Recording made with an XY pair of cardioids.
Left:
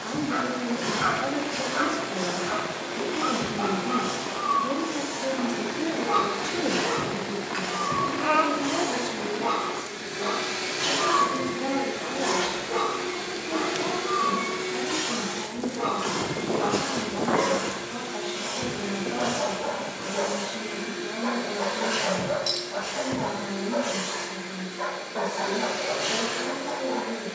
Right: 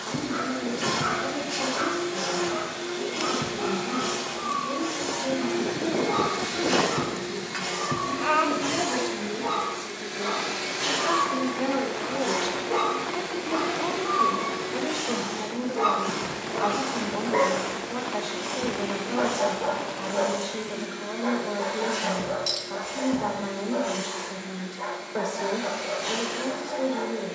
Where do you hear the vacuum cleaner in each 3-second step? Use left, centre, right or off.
right, right, right, centre, left, left, left, left, left.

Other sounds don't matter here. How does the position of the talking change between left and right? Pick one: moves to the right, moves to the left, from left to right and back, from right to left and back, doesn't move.
moves to the right.